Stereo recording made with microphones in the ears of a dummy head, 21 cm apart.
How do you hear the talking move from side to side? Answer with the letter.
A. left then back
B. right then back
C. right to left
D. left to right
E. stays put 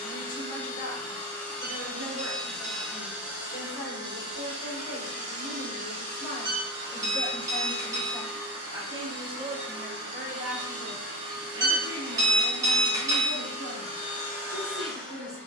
D.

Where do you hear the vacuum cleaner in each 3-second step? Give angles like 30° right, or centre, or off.
10° left, 20° right, 50° right, 70° right, 30° right.